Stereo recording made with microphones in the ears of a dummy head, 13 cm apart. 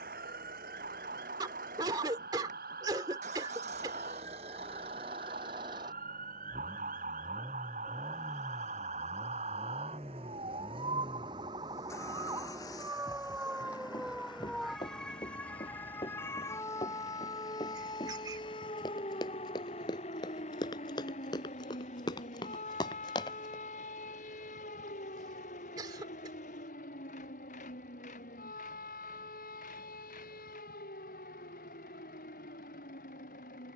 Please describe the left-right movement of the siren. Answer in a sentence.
You can hear the siren go from the right side to the left.